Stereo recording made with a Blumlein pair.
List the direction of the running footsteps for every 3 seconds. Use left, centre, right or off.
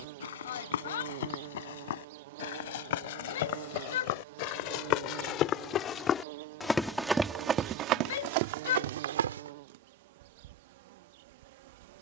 left, left, right, right.